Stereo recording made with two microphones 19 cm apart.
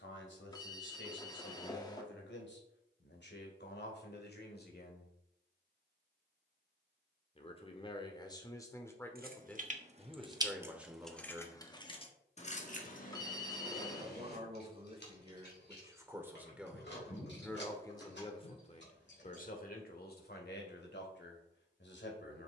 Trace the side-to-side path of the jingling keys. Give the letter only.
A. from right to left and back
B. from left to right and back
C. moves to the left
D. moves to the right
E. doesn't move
C.